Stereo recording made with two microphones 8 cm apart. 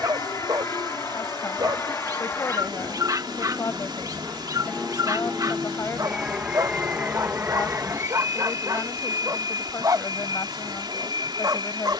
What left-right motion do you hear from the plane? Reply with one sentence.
You can hear the plane go from the left side to the right.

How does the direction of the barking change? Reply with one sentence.
In this clip you hear the barking stay put.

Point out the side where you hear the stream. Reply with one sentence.
You can hear the stream on the right.